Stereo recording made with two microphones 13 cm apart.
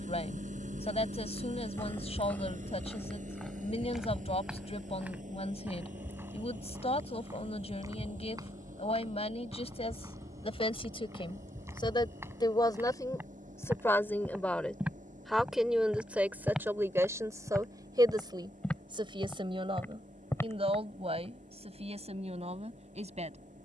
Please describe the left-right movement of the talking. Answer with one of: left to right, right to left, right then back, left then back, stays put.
left to right.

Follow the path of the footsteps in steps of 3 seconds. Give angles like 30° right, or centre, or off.
10° left, 10° right, 20° right, 20° right, 20° right, centre, 10° left, off.